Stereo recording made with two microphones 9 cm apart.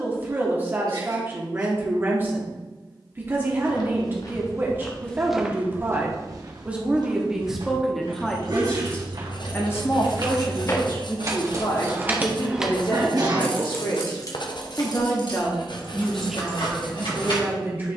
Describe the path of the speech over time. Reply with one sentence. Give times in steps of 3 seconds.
In this clip you hear the speech on the right from 0 s, in the centre from 6 s, on the left from 9 s and in the centre from 15 s.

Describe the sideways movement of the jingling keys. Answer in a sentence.
You can hear the jingling keys go from the right side to the left.